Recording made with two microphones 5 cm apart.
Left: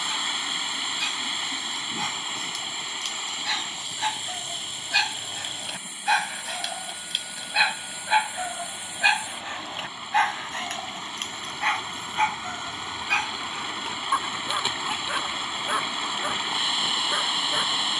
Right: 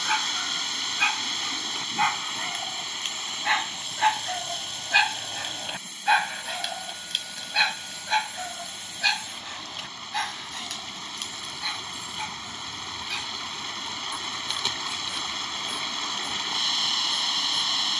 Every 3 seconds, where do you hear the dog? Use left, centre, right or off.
right, right, centre, left, left, left.